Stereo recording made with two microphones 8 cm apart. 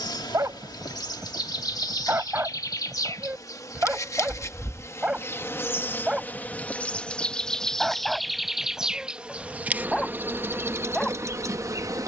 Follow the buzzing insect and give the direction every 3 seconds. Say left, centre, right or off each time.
left, left, centre, right.